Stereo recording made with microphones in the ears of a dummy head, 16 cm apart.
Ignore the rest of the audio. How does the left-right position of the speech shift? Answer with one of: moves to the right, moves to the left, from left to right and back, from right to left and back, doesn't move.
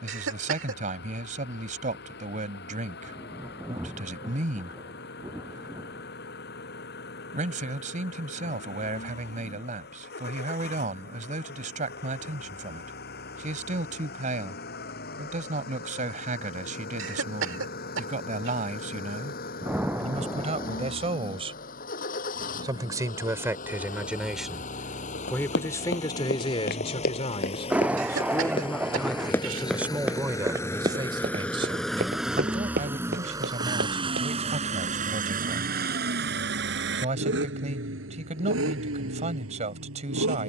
from right to left and back.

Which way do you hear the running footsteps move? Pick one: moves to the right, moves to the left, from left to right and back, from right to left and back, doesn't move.
moves to the right.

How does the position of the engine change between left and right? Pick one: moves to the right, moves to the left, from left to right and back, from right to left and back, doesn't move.
moves to the right.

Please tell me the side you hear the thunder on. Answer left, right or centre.
centre.